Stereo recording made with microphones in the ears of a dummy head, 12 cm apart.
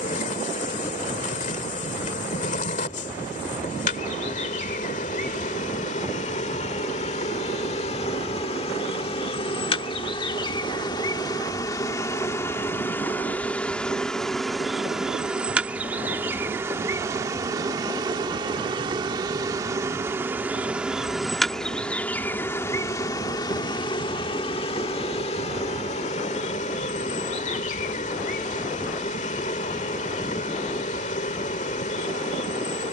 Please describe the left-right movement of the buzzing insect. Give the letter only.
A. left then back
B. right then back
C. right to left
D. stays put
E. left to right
B.